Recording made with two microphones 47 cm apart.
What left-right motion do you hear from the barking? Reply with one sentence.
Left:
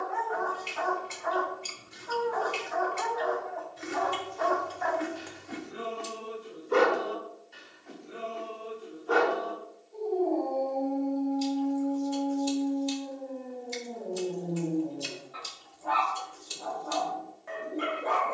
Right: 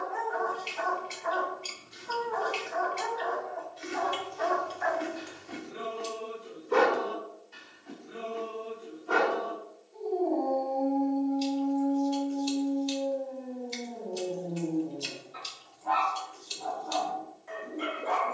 In this clip you hear the barking move from left to right and back again.